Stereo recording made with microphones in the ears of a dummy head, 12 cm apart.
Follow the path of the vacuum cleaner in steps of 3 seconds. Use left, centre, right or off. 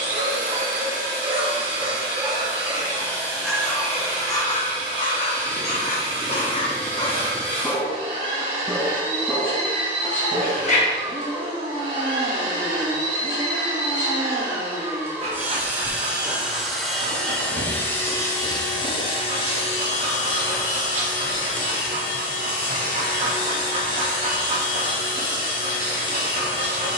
right, right, right, right, right, centre, left, left, left.